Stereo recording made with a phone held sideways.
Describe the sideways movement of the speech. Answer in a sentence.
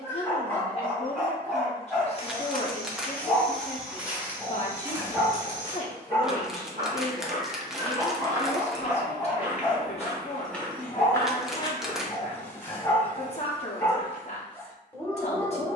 You can hear the speech stay in one place.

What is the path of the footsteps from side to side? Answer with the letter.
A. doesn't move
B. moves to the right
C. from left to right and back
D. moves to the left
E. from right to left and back
C.